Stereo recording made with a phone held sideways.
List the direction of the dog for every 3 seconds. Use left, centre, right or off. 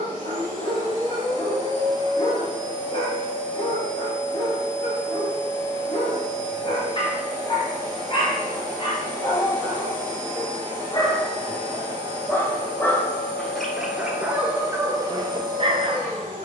left, left, left, left, centre, right.